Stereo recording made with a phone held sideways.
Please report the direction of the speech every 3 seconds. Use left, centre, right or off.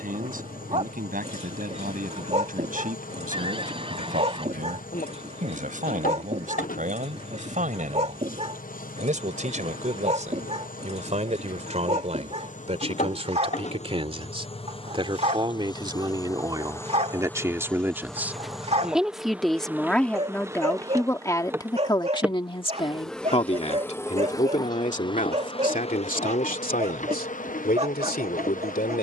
right, right, right, right, right, right, centre, left, left, left.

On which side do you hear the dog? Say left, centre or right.
right.